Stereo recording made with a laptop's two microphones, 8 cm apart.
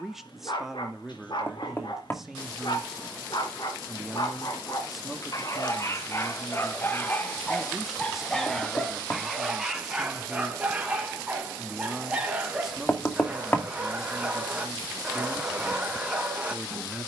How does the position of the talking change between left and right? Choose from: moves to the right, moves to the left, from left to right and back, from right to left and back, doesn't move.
doesn't move.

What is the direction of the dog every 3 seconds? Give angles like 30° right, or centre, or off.
60° left, 50° left, 20° left, 10° right, 10° right, 10° right.